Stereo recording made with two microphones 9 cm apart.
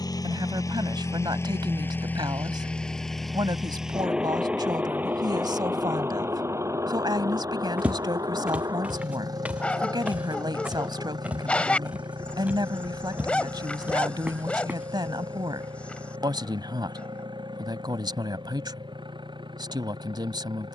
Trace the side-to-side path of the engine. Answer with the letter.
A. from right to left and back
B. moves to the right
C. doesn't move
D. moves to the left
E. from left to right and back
B.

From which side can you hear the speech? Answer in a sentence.
In this clip you hear the speech on the right.